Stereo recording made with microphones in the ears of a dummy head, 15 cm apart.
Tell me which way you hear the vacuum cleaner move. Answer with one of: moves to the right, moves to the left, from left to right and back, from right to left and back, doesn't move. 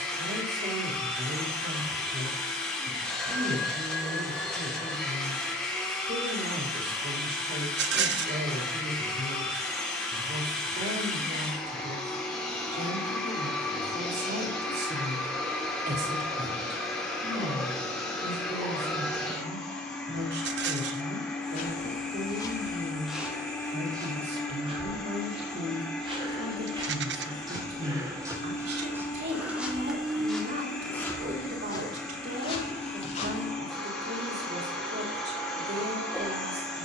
doesn't move.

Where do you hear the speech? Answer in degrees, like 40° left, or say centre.
60° right.